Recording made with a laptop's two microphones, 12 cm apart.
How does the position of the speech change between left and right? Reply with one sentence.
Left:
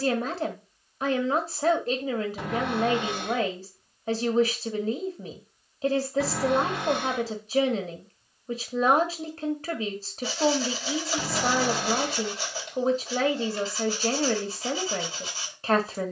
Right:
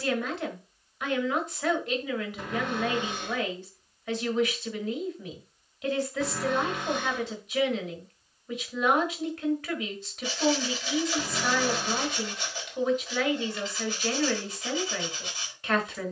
In this clip you hear the speech stay put.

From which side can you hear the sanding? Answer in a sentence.
In this clip you hear the sanding on the left.